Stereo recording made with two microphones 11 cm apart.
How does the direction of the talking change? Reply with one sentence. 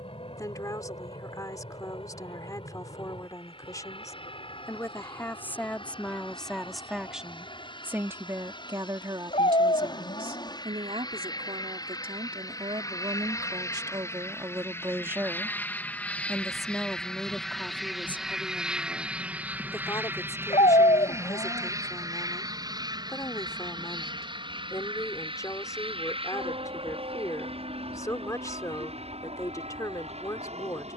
You can hear the talking move from left to right and back again.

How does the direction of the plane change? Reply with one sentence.
You can hear the plane go from the left side to the right.